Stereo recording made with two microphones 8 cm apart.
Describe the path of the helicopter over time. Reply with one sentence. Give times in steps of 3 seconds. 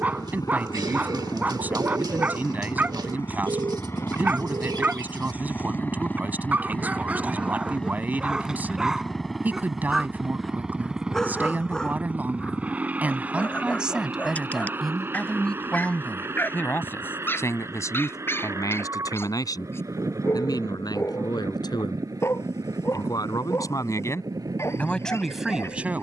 You can hear the helicopter on the left from 0 s, in the centre from 6 s and on the right from 12 s.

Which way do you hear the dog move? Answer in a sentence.
You can hear the dog travel towards the left.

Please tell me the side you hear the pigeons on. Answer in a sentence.
In this clip you hear the pigeons on the right.